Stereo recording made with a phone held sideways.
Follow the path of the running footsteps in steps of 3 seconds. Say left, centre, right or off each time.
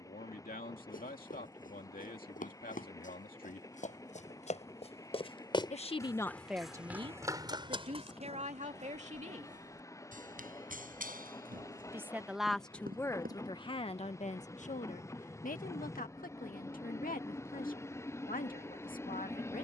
left, left, right, right, right, off, off.